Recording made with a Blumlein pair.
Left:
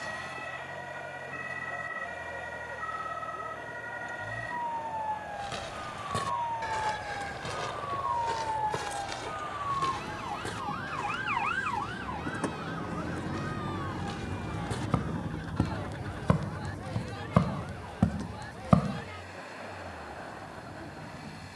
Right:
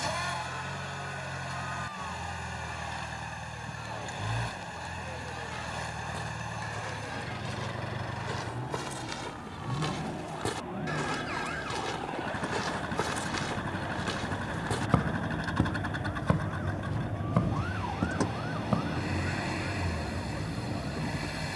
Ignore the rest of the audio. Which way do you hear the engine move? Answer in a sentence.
In this clip you hear the engine stay in one place.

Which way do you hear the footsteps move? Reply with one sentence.
You can hear the footsteps go right and come back.